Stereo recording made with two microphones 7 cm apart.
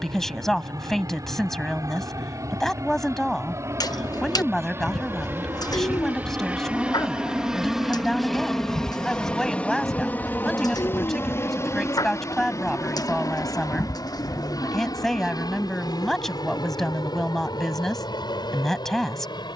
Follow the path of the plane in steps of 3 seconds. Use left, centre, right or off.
right, right, centre, left, left, left, left.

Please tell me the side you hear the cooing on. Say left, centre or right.
left.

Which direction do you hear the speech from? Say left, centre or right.
centre.